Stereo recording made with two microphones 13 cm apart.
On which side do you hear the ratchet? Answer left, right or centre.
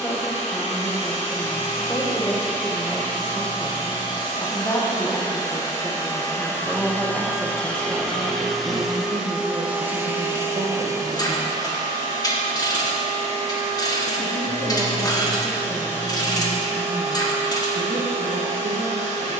left.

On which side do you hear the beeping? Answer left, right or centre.
left.